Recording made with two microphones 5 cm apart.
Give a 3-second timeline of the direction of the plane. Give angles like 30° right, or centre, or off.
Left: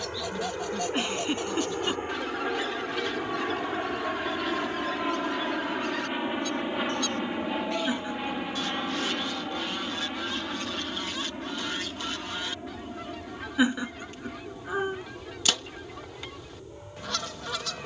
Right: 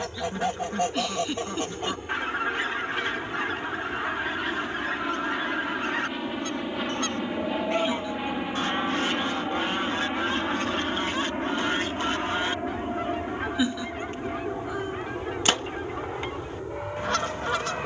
40° left, 30° left, centre, 30° right, 50° right, 60° right.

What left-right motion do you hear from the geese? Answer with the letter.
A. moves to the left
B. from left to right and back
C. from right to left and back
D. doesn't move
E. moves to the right
D.